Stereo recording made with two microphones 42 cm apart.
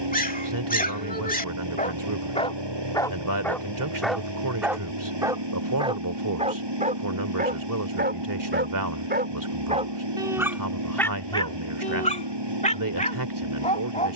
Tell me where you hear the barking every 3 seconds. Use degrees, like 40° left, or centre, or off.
20° left, centre, 20° right, centre, 20° left.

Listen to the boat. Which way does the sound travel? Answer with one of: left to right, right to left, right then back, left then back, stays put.
stays put.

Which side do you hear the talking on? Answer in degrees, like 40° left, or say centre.
50° right.